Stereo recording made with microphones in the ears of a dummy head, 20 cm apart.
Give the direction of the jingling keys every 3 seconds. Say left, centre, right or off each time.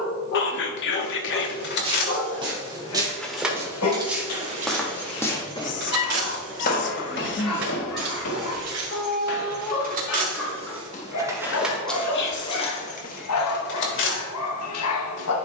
left, right, right, right, left.